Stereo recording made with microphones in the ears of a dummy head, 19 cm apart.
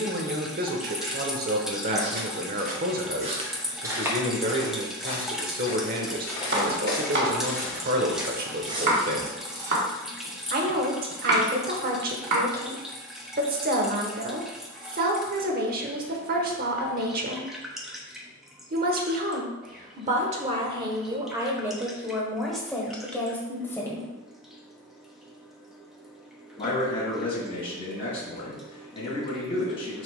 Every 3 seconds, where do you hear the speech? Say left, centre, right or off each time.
right, right, right, right, right, right, right, centre, left, left.